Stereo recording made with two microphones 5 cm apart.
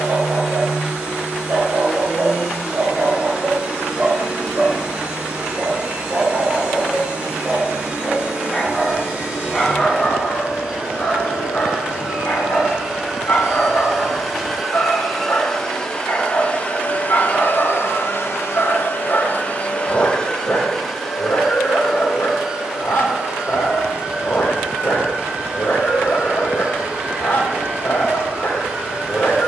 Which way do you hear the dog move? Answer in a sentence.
You can hear the dog move from right to left.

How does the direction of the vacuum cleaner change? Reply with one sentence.
You can hear the vacuum cleaner move from right to left and back again.